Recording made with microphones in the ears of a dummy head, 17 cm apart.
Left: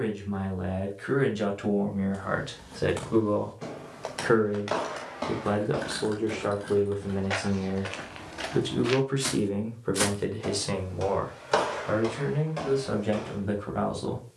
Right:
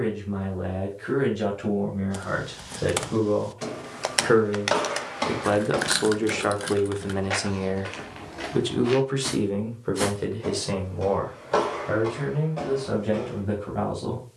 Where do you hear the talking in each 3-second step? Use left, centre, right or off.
left, centre, right, centre, left.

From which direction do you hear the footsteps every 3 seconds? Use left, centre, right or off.
off, right, centre, left, left.